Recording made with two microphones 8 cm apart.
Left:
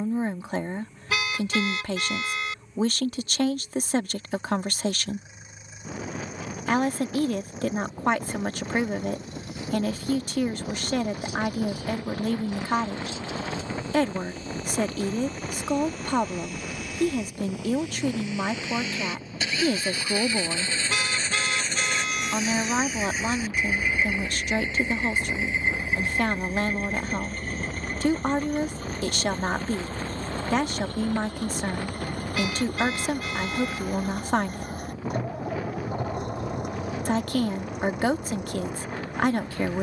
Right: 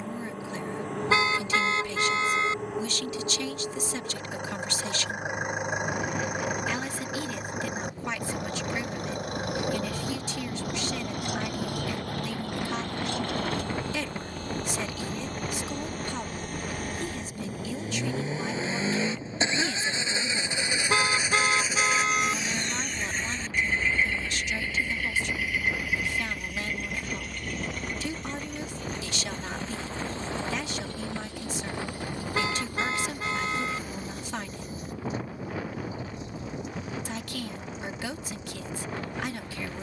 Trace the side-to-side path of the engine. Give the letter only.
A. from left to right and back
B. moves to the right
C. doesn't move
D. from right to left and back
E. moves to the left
E.